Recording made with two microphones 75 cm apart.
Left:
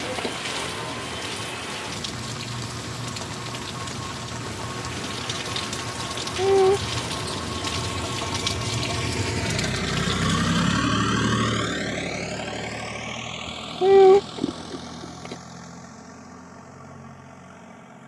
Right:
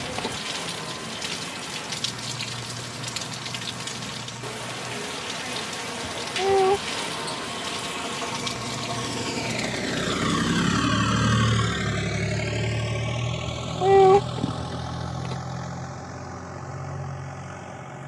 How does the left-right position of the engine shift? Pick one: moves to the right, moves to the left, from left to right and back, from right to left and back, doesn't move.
moves to the right.